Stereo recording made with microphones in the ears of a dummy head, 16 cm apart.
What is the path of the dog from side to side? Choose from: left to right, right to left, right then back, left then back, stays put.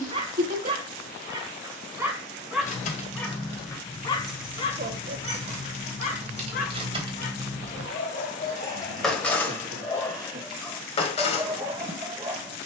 left then back.